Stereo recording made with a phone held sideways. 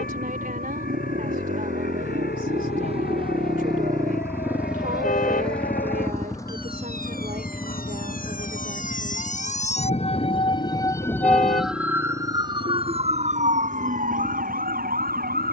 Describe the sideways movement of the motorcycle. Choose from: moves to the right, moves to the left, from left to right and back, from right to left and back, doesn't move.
moves to the left.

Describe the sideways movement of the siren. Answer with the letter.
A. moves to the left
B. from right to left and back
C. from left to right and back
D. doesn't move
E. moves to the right
E.